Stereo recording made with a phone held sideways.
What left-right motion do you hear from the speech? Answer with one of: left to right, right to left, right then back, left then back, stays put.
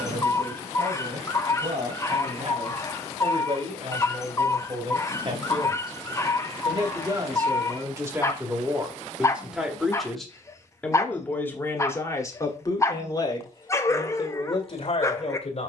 right to left.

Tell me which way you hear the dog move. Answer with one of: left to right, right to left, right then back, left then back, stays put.
stays put.